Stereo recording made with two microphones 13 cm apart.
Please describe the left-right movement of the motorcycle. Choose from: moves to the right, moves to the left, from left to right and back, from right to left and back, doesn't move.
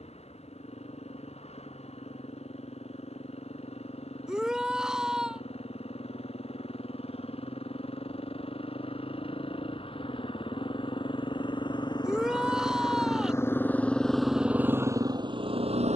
moves to the right.